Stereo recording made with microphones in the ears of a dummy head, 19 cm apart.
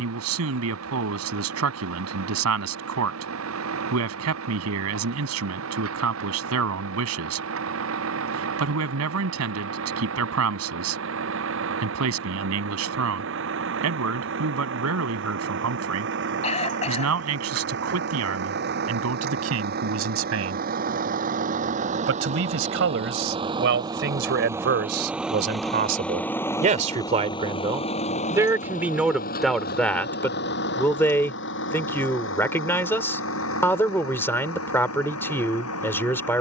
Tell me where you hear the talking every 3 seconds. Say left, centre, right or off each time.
right, right, right, right, right, right, right, right, right, centre, centre, centre.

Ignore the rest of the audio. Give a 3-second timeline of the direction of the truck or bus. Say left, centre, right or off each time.
right, right, right, right, right, right, right, right, centre, left, left, left.